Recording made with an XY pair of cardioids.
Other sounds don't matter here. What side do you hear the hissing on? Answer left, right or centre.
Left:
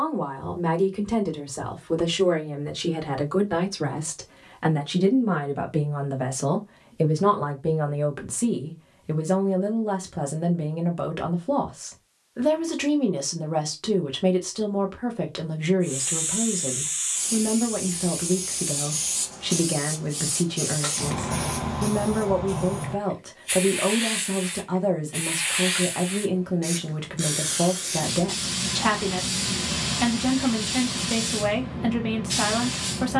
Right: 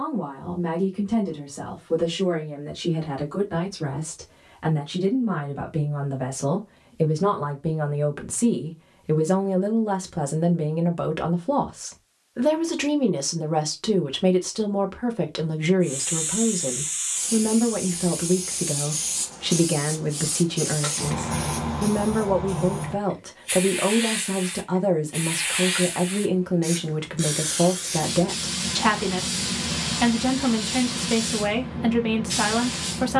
centre.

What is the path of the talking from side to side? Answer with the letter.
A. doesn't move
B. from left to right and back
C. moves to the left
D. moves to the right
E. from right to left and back
D.